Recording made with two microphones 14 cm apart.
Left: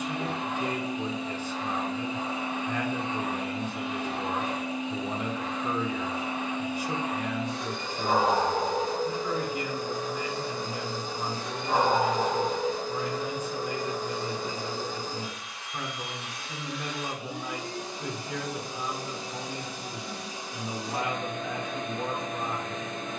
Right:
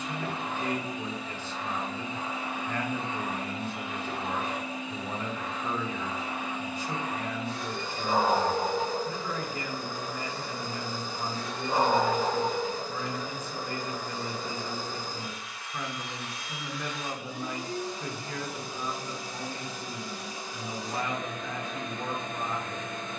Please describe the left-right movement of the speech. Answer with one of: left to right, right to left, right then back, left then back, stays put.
stays put.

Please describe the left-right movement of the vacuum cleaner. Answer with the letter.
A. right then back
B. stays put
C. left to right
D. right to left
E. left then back
B.